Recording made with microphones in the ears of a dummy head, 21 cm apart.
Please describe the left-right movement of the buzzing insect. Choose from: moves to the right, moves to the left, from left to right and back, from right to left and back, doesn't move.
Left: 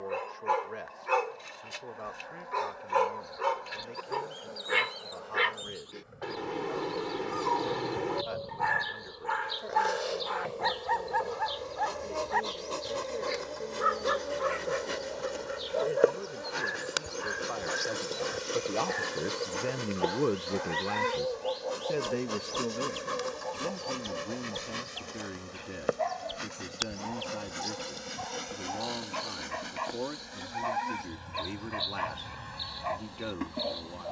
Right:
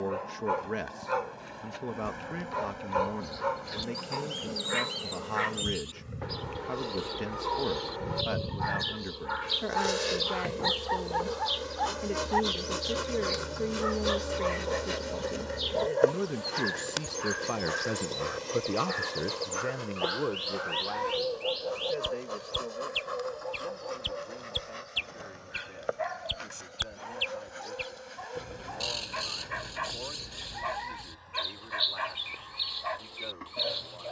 moves to the left.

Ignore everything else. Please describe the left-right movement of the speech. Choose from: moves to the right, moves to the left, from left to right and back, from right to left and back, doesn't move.
moves to the left.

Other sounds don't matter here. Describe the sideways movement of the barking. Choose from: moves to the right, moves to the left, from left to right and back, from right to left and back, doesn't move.
moves to the right.